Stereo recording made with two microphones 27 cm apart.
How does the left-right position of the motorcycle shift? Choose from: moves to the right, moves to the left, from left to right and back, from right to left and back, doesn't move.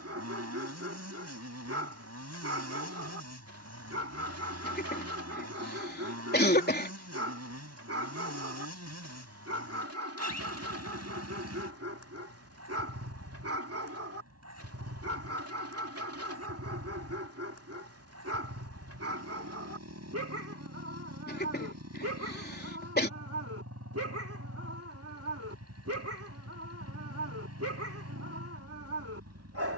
doesn't move.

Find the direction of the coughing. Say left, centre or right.
left.